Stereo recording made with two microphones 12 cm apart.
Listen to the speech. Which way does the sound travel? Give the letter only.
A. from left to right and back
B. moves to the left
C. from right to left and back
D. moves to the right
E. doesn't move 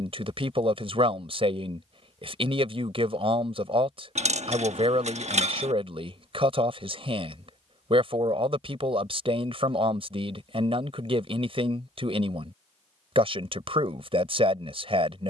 E.